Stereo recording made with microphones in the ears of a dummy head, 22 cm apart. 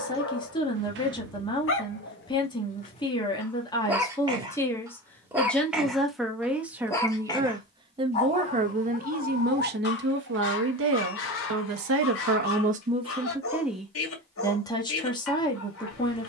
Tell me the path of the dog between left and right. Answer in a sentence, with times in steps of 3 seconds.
You can hear the dog on the left from 0 s, in the centre from 3 s and on the left from 6 s.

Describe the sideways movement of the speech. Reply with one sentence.
You can hear the speech go right and come back.